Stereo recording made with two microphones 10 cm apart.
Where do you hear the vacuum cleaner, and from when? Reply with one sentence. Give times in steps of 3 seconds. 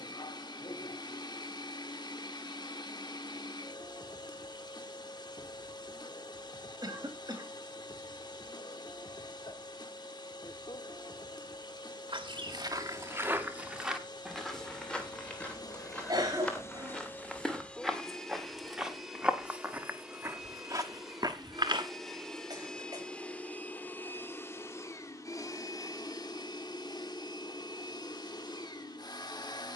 In this clip you hear the vacuum cleaner on the left from 0 s, in the centre from 18 s and on the left from 24 s.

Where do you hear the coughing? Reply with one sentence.
In this clip you hear the coughing on the right.